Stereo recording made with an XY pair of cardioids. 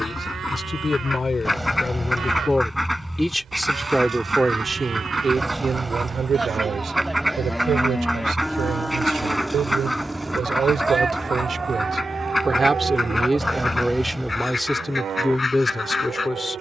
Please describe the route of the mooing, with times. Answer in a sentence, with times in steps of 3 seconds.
You can hear the mooing on the right from 0 s, in the centre from 6 s and on the right from 9 s.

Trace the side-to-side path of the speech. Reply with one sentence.
You can hear the speech go right and come back.